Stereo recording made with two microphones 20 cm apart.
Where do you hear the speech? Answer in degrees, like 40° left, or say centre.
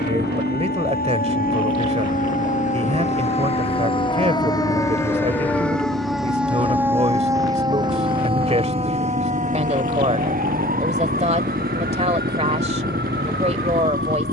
30° right.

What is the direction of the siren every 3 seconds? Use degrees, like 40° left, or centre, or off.
50° left, 20° left, 20° right, 40° right, 60° right.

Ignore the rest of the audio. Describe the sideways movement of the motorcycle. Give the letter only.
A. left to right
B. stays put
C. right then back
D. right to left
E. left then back
B.